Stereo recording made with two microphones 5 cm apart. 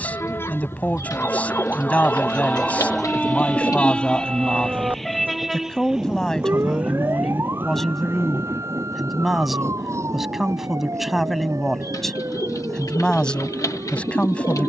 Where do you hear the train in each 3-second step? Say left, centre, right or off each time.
left, centre, right, right, right.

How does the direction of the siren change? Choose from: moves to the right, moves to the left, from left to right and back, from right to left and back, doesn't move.
moves to the right.